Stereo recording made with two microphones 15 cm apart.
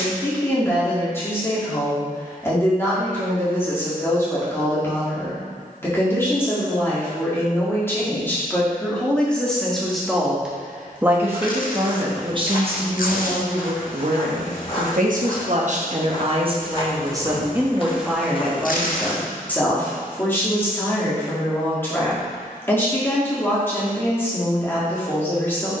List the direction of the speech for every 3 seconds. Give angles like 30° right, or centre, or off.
20° left, 20° left, 10° left, 10° right, 50° right, 40° right, 10° left, 10° left, 10° left.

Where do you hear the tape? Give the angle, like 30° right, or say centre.
70° left.